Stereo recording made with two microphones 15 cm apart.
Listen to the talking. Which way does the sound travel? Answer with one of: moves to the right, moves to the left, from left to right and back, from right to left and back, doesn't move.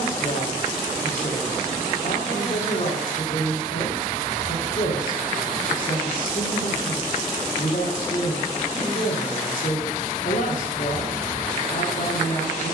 doesn't move.